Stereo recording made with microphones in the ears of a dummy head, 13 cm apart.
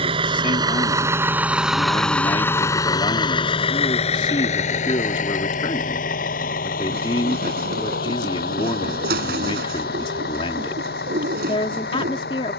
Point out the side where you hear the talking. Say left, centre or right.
left.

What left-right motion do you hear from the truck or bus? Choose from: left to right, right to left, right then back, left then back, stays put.
right to left.